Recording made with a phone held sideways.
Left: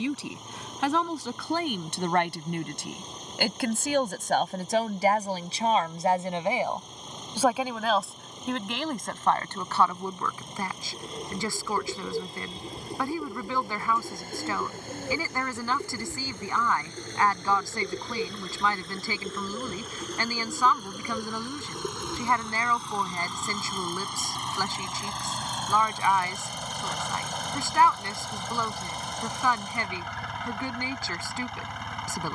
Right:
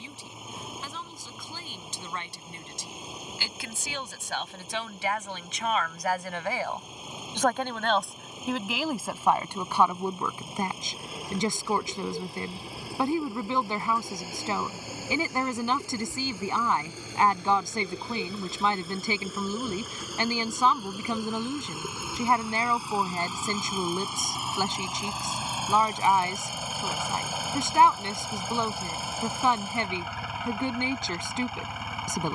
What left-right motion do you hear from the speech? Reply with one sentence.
In this clip you hear the speech move to the right.